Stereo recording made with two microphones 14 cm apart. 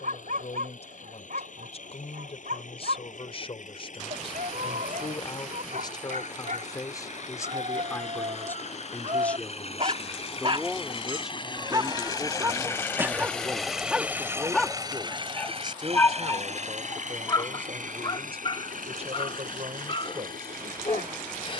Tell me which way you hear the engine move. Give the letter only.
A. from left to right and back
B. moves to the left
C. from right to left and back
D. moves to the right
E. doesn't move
D.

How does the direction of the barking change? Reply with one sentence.
You can hear the barking move from right to left.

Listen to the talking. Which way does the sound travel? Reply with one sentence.
In this clip you hear the talking travel towards the right.